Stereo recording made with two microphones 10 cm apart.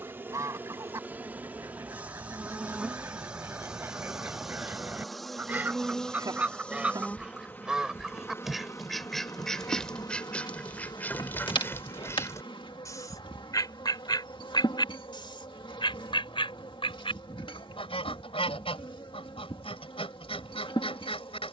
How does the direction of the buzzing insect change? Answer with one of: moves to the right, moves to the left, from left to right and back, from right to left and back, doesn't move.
moves to the left.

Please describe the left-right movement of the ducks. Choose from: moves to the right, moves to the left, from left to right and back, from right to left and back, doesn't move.
moves to the left.